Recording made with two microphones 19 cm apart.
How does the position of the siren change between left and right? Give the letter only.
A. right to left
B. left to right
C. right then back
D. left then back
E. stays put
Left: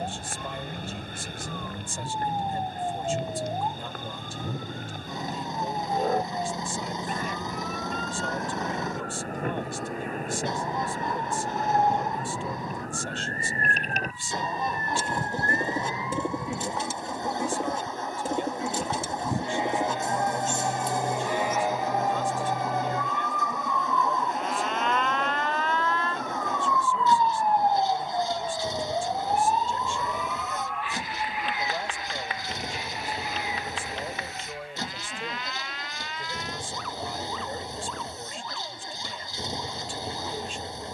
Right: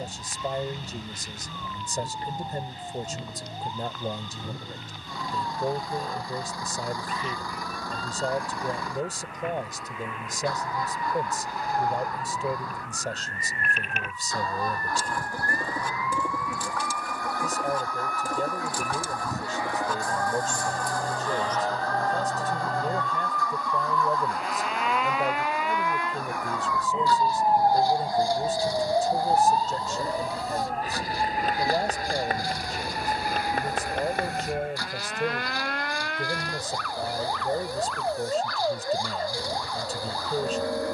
B.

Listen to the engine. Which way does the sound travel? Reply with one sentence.
In this clip you hear the engine stay put.